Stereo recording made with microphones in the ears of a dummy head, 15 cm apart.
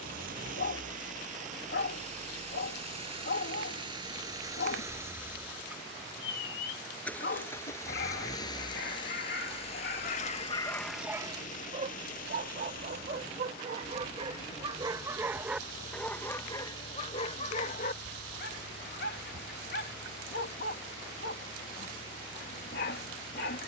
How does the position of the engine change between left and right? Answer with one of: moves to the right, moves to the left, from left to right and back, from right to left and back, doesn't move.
moves to the left.